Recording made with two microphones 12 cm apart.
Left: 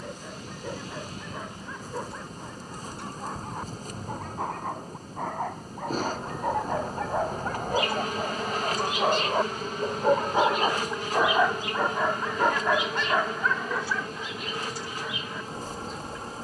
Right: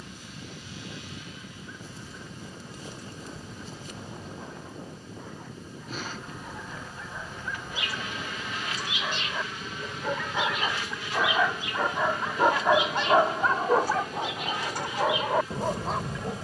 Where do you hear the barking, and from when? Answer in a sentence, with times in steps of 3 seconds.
You can hear the barking on the left from 0 s and on the right from 12 s.